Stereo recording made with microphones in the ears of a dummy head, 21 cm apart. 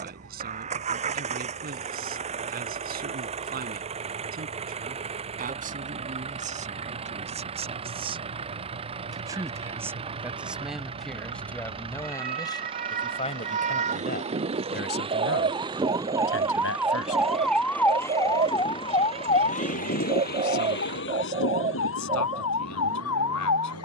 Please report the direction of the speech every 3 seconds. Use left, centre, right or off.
right, right, right, centre, left, left, left, left.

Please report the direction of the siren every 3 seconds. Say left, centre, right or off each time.
right, right, right, right, right, centre, left, left.